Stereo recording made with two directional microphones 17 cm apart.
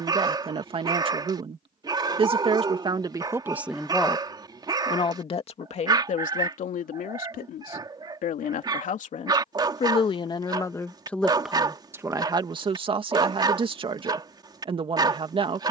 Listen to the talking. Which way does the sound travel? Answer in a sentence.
You can hear the talking go left and come back.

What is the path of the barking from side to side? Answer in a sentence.
You can hear the barking stay put.